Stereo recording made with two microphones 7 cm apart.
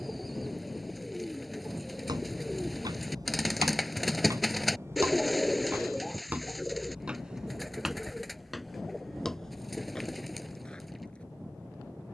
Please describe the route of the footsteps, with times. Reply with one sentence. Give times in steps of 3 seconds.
You can hear the footsteps on the right from 0 s and in the centre from 6 s.